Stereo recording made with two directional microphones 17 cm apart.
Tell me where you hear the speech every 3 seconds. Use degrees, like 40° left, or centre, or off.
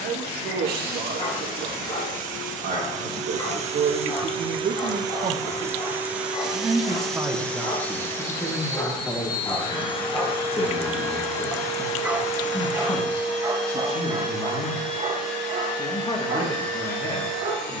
70° right, 50° right, 10° right, 20° left, 30° left, 30° left.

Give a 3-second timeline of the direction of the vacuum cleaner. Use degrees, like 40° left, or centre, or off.
60° right, 30° right, 10° left, 30° left, 40° left, 50° left.